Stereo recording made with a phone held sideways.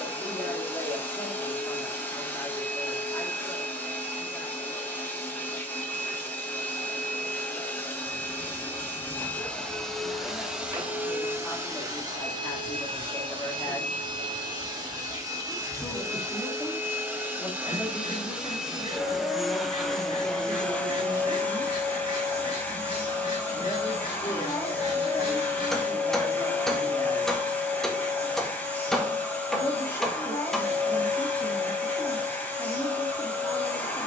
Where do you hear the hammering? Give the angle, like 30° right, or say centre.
centre.